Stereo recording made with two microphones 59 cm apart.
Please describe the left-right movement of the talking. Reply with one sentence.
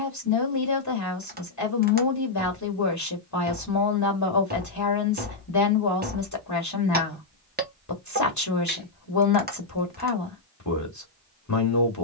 In this clip you hear the talking stay put.